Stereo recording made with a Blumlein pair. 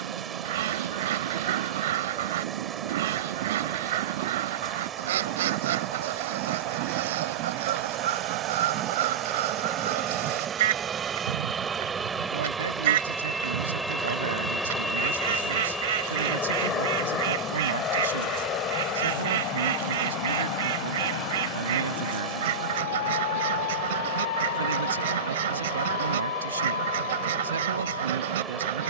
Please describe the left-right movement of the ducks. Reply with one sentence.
You can hear the ducks stay in one place.